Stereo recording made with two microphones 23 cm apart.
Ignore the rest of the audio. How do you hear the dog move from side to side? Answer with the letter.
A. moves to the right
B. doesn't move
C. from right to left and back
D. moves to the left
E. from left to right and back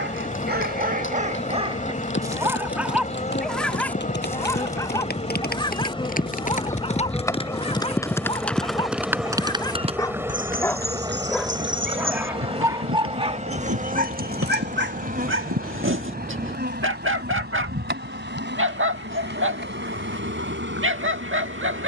C.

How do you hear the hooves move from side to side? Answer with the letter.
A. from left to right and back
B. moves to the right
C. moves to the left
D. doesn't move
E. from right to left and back
B.